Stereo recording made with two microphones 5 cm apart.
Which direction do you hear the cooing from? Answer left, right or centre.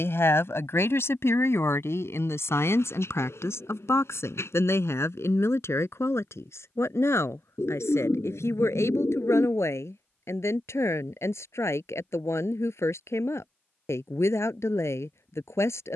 left.